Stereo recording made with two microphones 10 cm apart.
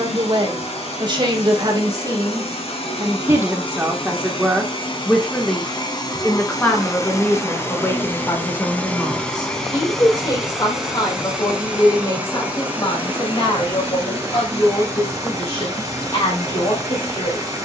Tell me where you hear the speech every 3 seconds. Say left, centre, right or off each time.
right, centre, left, left, left, left.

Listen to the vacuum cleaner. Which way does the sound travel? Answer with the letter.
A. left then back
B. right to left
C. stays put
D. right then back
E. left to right
E.